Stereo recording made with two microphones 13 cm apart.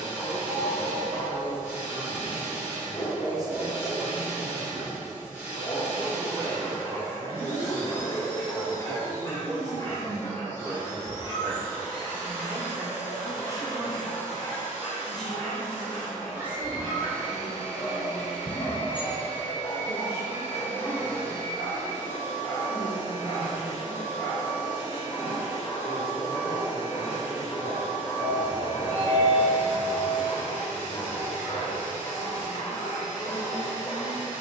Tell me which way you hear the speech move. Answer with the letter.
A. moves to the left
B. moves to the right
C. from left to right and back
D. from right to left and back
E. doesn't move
A.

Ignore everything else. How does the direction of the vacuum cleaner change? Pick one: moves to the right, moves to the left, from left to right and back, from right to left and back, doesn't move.
doesn't move.